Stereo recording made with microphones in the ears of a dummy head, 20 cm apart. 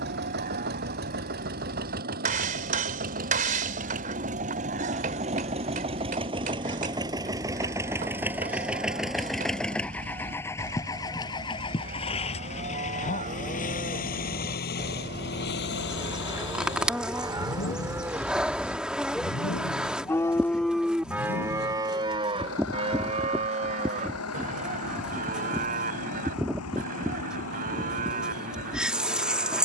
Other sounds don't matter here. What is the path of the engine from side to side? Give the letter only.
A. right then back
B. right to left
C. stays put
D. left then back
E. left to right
B.